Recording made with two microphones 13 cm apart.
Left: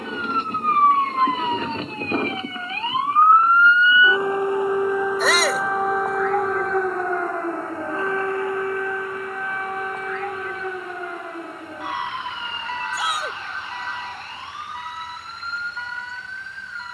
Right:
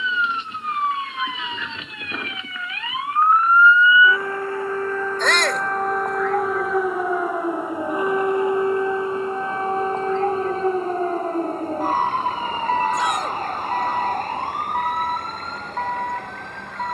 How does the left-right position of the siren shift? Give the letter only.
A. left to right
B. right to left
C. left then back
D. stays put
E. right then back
A.